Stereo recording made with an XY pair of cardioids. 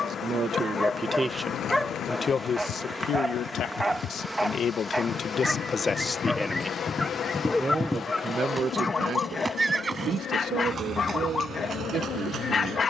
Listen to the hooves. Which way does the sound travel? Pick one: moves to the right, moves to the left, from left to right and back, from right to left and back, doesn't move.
moves to the right.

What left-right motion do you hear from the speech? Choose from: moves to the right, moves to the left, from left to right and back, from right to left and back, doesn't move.
from right to left and back.